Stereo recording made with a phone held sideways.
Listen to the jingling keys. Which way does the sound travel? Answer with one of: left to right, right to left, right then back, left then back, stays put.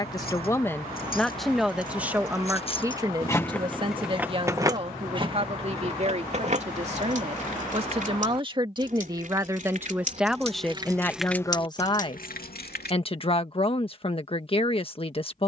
right then back.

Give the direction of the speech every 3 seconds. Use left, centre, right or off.
centre, right, right, centre, left.